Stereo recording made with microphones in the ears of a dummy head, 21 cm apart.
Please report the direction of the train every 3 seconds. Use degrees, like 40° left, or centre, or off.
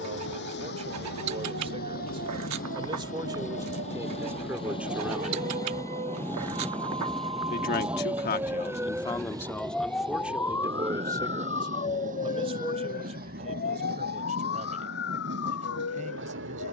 40° left, 20° left, centre, 20° right, 40° right, 50° right.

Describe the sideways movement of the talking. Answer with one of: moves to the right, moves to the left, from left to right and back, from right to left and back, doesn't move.
from right to left and back.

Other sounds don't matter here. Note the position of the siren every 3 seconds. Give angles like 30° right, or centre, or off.
50° right, 40° right, 20° right, 10° left, 40° left, 60° left.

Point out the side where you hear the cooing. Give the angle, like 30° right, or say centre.
80° right.